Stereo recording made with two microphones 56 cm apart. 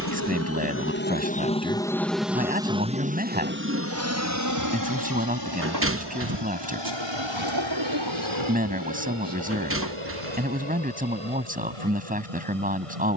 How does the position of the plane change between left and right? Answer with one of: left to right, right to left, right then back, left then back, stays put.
left to right.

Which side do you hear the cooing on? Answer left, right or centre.
right.